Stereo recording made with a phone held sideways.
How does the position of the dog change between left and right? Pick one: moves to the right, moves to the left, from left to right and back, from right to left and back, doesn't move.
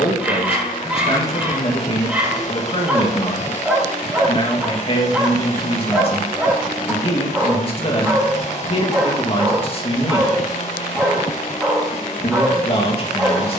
doesn't move.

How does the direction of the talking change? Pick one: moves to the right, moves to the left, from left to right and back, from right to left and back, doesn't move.
doesn't move.